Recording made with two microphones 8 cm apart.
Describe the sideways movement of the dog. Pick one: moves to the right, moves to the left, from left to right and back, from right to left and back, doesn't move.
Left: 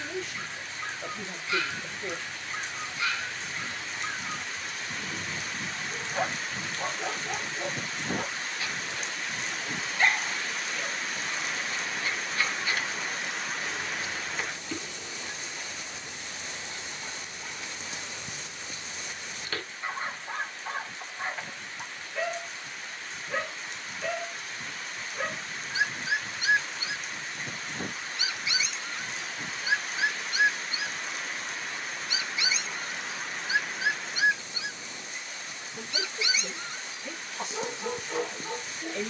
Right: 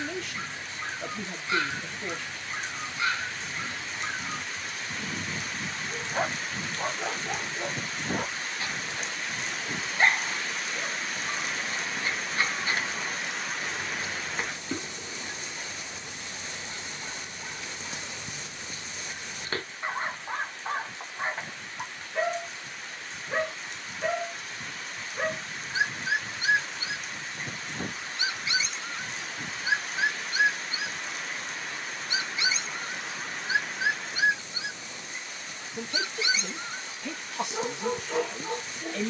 doesn't move.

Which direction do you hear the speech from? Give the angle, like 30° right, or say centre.
70° right.